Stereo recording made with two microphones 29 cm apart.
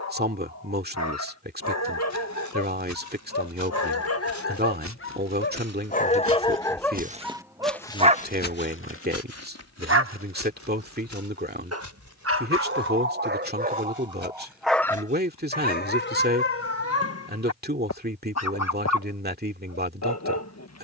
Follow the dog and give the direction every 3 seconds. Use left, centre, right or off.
left, left, centre, right, right, left, left.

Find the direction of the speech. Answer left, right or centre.
right.